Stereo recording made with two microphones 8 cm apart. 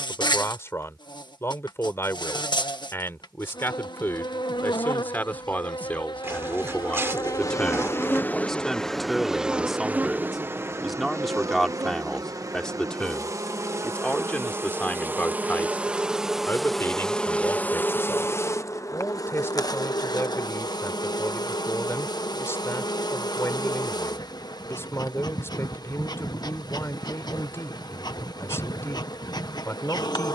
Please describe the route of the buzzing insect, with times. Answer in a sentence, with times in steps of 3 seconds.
In this clip you hear the buzzing insect on the left from 0 s, on the right from 9 s, in the centre from 15 s and on the left from 18 s.